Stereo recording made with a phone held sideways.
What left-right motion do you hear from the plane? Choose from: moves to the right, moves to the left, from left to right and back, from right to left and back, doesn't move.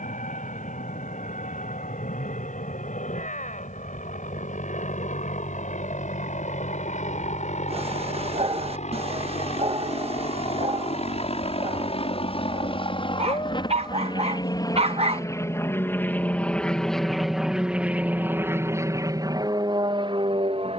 moves to the right.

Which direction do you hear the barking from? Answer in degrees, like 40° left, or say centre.
40° right.